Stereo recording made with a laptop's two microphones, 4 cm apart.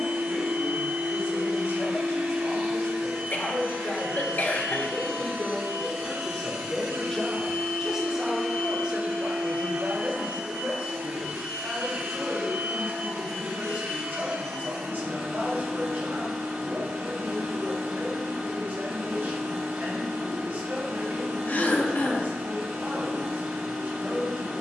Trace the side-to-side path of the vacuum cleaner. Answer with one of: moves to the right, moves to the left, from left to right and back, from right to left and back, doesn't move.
doesn't move.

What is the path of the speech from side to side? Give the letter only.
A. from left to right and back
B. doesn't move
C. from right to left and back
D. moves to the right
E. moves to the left
D.